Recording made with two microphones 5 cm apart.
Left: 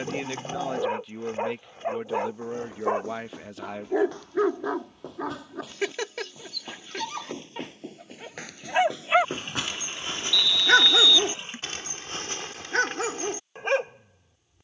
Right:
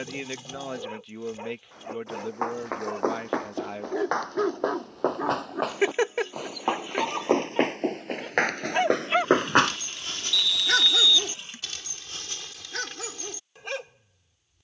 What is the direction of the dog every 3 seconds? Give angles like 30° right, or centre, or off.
40° left, centre, 10° right, 30° left, 40° left.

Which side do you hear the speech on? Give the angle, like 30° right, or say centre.
centre.